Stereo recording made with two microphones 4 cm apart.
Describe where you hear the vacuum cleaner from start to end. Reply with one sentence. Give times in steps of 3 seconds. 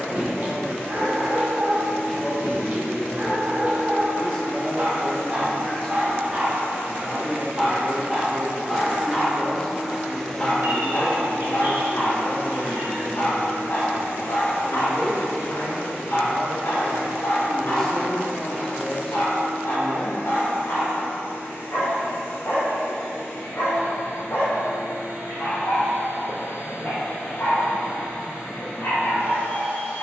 You can hear the vacuum cleaner on the right from 0 s, in the centre from 9 s and on the left from 12 s.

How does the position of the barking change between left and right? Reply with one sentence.
In this clip you hear the barking move to the left.